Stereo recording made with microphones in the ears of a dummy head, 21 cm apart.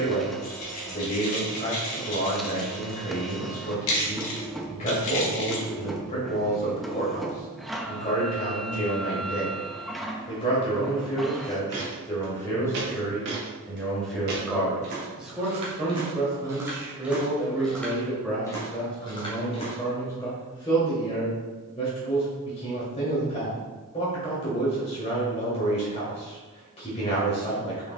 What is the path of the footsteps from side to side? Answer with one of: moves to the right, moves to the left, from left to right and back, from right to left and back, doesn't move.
moves to the left.